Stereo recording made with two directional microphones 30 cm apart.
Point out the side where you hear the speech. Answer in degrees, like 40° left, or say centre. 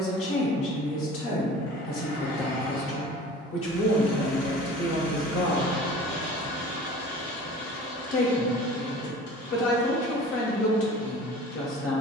50° left.